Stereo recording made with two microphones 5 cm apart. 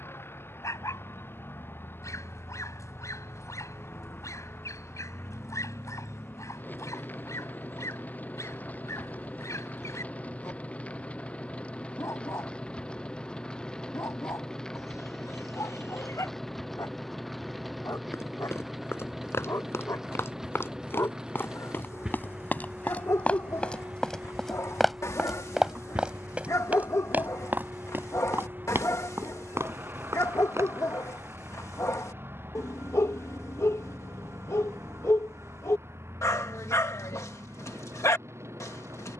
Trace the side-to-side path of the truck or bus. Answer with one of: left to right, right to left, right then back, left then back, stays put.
left to right.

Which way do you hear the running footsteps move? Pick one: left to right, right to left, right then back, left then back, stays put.
left to right.